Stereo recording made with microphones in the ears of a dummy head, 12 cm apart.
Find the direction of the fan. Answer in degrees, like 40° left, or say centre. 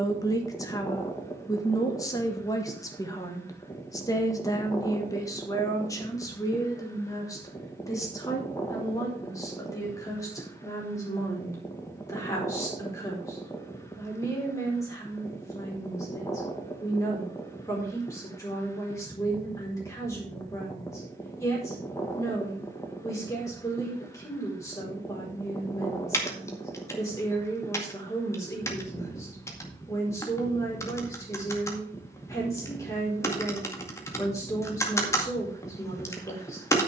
20° left.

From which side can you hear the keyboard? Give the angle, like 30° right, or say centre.
20° left.